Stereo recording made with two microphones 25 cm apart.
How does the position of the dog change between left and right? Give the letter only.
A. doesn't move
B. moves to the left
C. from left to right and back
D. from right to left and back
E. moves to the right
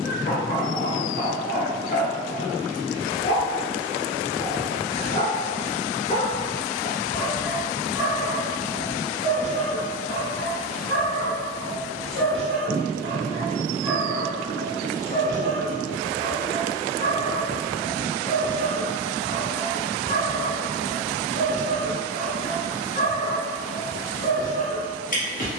C.